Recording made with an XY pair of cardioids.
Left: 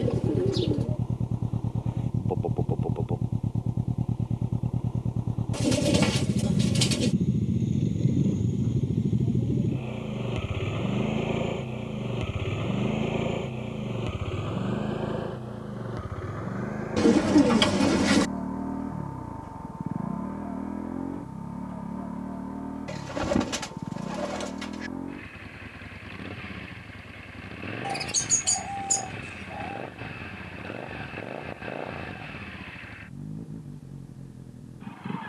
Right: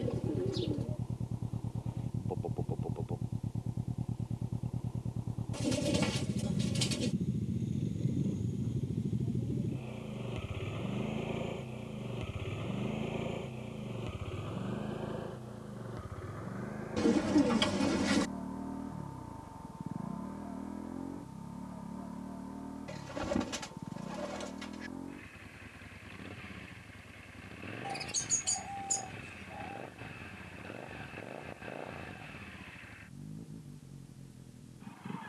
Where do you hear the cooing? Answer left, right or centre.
left.